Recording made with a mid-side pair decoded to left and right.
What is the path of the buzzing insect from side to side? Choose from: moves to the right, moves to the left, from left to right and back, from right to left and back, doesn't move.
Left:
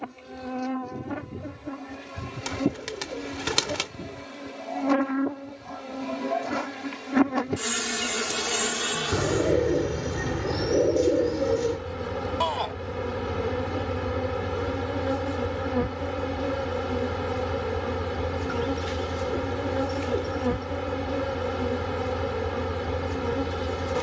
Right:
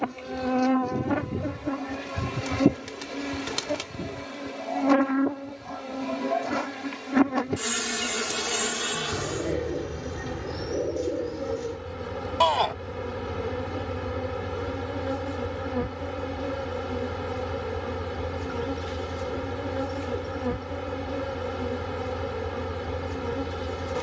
moves to the left.